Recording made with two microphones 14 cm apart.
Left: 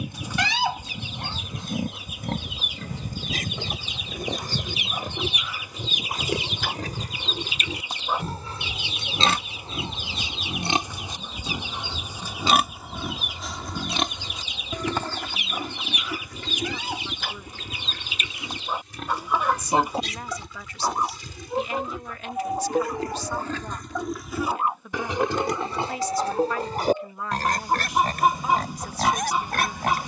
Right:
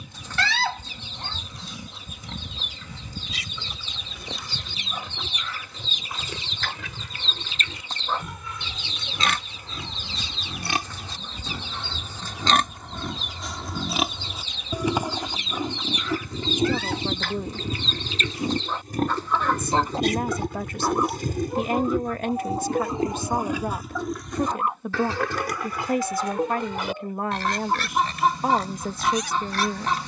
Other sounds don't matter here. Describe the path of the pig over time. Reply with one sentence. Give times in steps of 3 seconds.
You can hear the pig on the left from 0 s, in the centre from 12 s, on the right from 15 s and on the left from 24 s.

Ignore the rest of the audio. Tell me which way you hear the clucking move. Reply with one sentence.
In this clip you hear the clucking stay in one place.